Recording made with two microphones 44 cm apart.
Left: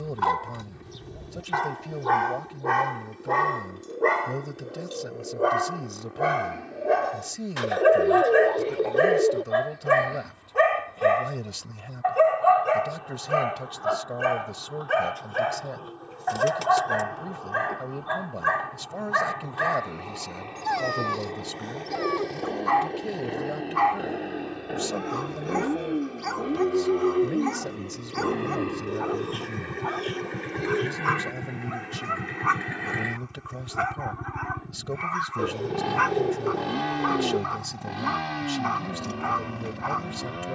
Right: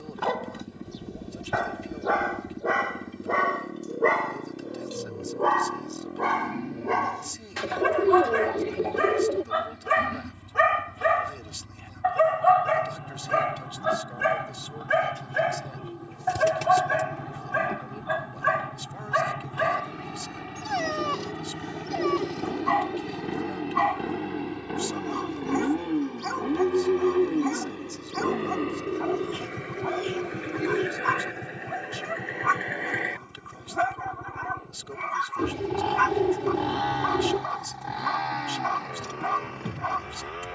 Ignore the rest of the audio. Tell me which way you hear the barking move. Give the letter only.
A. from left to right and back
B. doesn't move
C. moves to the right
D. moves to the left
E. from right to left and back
C.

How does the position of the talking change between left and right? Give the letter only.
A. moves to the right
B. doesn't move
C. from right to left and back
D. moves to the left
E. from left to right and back
B.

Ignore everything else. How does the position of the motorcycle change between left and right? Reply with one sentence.
You can hear the motorcycle move from right to left.